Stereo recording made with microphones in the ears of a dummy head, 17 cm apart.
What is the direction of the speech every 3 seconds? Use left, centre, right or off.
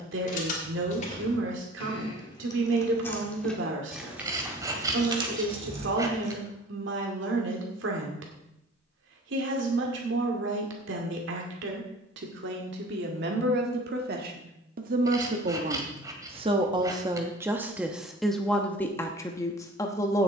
right, right, right, right, right, right, centre.